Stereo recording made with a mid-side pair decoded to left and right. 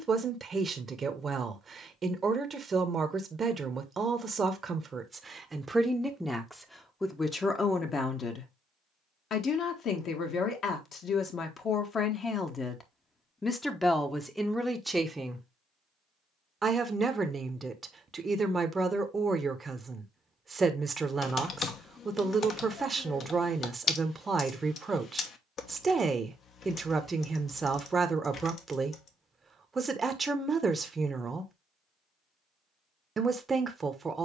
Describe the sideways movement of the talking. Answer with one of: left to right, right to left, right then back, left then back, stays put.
left then back.